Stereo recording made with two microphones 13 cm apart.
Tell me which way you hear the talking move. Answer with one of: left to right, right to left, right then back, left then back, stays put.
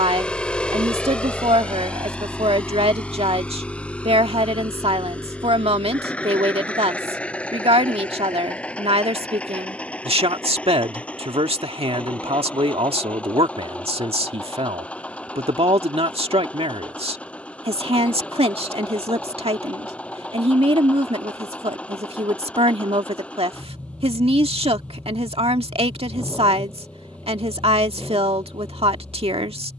stays put.